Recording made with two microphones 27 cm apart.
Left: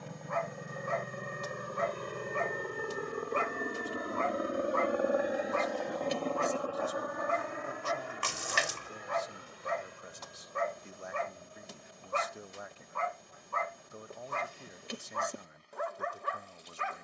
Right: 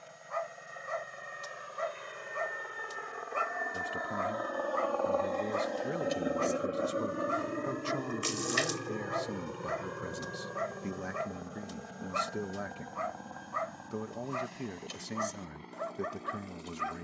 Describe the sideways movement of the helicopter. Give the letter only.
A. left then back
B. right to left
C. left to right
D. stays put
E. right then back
C.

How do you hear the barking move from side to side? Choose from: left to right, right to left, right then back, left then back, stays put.
stays put.